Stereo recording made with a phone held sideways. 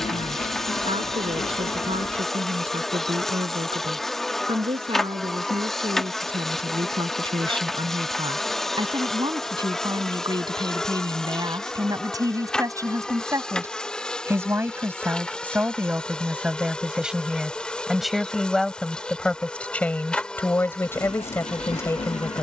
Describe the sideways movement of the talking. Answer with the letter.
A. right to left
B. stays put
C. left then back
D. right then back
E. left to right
A.